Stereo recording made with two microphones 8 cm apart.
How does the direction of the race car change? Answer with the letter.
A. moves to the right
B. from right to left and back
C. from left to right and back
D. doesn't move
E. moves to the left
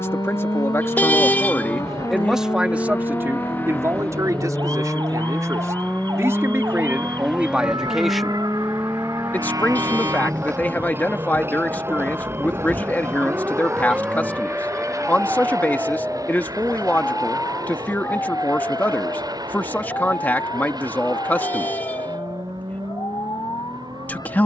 A.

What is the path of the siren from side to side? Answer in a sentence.
In this clip you hear the siren go from the right side to the left.